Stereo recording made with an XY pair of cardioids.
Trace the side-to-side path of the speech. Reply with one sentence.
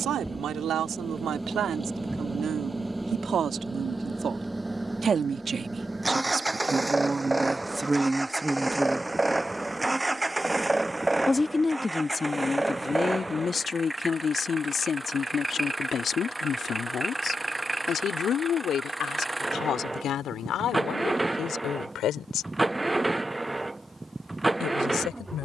In this clip you hear the speech travel towards the left.